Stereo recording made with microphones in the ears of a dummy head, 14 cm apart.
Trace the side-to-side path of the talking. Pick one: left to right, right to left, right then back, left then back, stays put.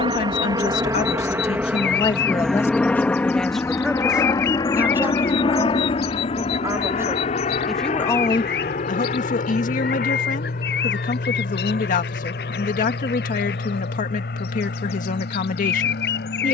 right then back.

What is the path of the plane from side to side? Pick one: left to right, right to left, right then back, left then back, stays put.
right to left.